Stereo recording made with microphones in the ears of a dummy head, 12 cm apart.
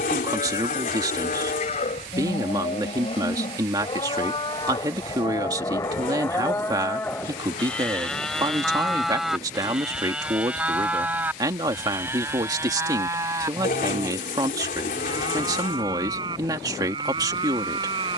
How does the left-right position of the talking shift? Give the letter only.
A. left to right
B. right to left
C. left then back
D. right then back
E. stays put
E.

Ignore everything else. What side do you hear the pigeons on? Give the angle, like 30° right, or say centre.
70° left.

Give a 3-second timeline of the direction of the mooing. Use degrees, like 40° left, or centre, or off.
50° left, 30° left, 10° left, 10° right, 20° right, 30° right.